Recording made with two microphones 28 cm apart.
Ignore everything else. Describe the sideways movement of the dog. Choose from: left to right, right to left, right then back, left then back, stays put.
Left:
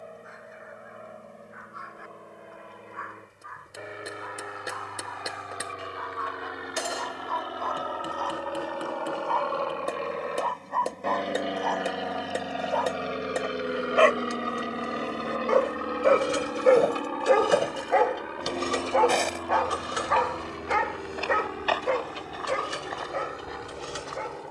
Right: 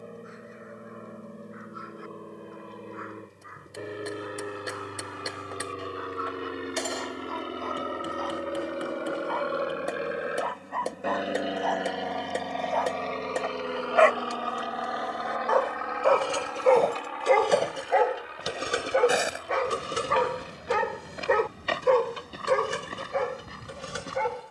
left to right.